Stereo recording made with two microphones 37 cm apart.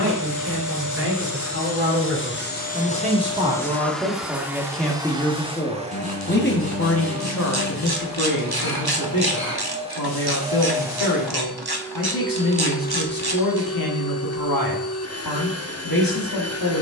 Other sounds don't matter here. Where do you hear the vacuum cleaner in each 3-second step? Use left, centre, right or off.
left, centre, right, centre, left, left.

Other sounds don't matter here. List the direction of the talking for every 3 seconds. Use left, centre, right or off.
right, centre, left, left, left, left.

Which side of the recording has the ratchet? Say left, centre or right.
right.